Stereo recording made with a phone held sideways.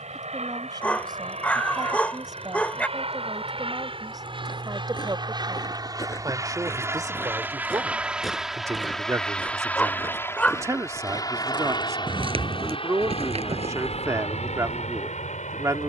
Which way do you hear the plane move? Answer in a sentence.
You can hear the plane move to the left.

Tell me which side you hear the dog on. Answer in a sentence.
In this clip you hear the dog in the centre.